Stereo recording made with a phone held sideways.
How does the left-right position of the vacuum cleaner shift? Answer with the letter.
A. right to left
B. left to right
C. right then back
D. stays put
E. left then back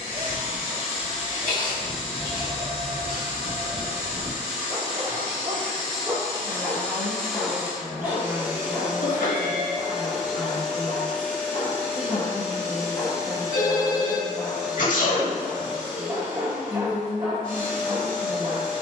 C.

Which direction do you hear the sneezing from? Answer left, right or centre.
left.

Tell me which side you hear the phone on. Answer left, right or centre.
left.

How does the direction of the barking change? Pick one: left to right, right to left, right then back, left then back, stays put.
left then back.